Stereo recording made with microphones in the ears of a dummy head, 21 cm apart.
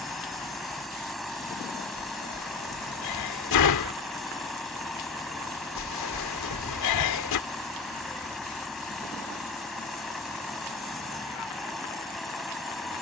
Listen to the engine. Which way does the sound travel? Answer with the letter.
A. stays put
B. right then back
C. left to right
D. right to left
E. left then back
A.